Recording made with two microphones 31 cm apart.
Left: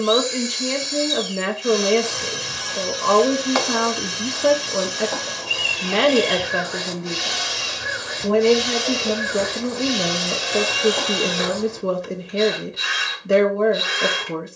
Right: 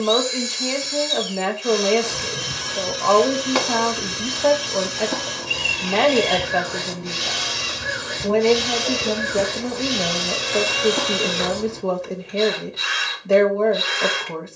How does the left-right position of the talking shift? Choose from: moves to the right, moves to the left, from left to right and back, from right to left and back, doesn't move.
doesn't move.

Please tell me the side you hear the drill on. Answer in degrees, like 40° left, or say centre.
centre.